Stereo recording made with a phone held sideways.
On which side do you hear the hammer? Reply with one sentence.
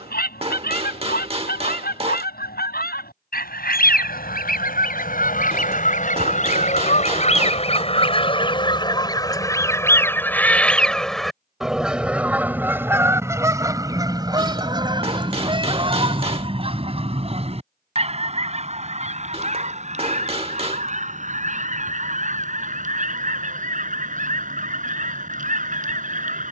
You can hear the hammer on the right.